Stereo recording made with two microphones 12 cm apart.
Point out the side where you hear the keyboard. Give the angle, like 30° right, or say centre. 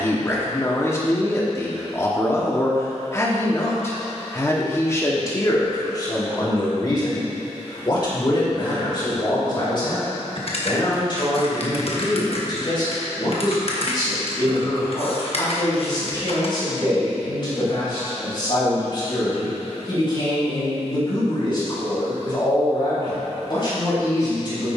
50° left.